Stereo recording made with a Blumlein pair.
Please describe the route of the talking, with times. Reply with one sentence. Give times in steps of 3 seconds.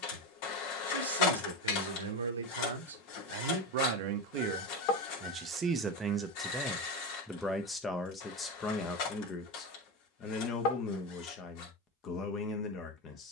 You can hear the talking on the right from 0 s, in the centre from 6 s and on the left from 9 s.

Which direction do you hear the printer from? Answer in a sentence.
In this clip you hear the printer on the left.